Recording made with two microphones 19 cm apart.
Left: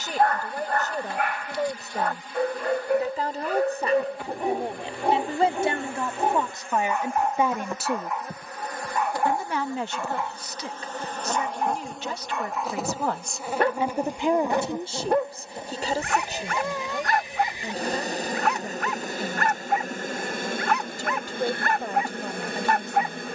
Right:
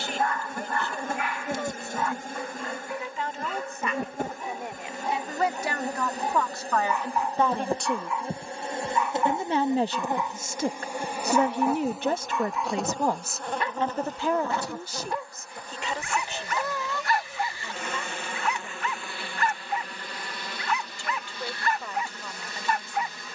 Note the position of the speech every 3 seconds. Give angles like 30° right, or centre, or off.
40° left, 30° left, 10° left, 50° right, centre, 40° left, 40° left, 40° left.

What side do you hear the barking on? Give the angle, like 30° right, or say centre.
60° left.